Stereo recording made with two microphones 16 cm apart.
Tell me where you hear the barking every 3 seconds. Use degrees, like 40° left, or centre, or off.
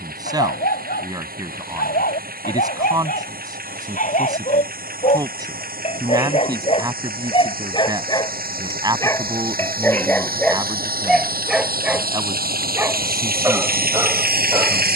70° left, 50° left, 30° left, 10° left, 20° right.